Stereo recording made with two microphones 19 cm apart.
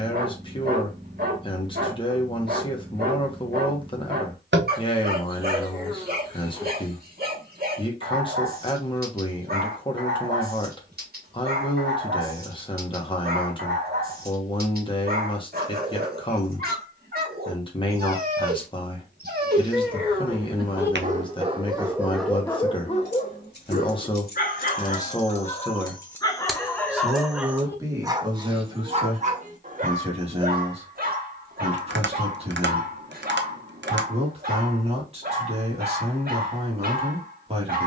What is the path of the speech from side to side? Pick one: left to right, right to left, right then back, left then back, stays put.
left to right.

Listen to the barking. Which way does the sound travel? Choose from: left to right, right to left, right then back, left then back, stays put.
left then back.